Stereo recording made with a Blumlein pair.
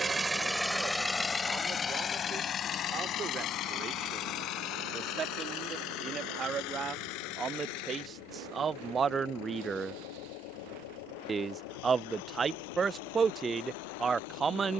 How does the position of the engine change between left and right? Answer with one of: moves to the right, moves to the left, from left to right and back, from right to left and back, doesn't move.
moves to the left.